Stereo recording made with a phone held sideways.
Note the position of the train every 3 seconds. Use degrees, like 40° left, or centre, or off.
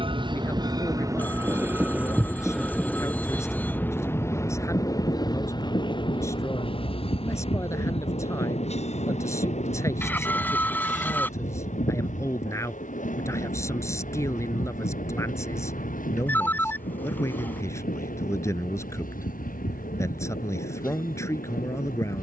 20° right, 20° left, 40° left, 50° left, 60° left, 60° left, 60° left, 60° left.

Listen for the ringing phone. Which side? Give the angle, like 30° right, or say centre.
10° left.